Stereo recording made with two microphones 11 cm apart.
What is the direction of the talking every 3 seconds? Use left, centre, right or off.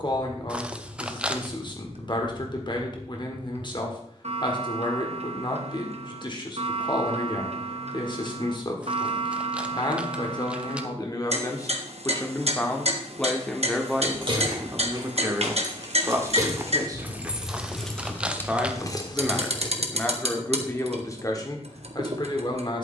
left, left, left, left, centre, right, centre, left.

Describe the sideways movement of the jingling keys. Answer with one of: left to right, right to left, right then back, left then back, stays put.
right to left.